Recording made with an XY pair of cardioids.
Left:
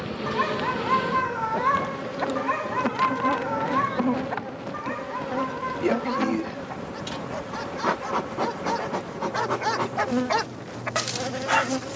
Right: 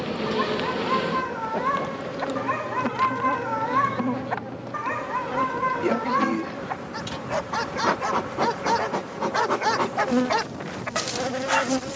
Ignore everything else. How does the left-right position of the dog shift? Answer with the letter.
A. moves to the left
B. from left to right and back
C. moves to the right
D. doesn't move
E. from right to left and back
B.